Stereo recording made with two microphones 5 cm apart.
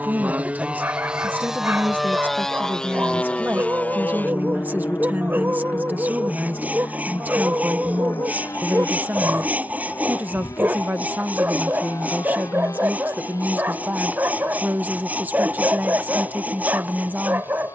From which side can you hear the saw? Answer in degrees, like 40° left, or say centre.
30° right.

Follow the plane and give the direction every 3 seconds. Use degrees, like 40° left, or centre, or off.
10° right, 40° left, 60° left, 70° left, 70° left, 80° left.